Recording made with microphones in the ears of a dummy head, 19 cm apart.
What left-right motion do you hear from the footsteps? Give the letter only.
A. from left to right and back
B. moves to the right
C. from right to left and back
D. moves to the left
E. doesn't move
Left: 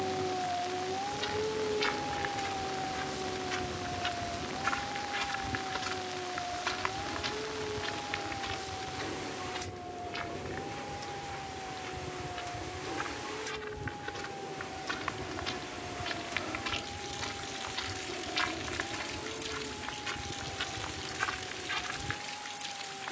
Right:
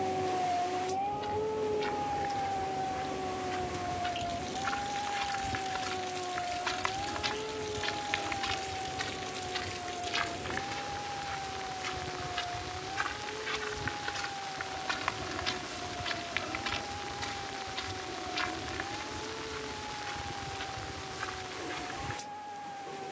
A.